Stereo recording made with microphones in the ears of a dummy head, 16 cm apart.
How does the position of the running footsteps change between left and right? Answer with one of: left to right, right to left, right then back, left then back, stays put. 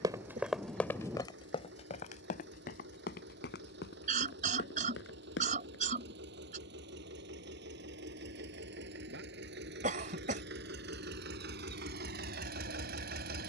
right to left.